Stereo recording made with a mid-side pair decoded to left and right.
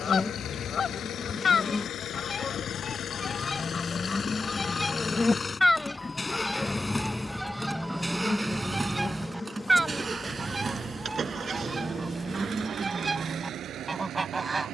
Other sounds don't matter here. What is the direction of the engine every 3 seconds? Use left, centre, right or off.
left, left, centre, right, right.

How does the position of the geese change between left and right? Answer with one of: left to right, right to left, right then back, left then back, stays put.
left to right.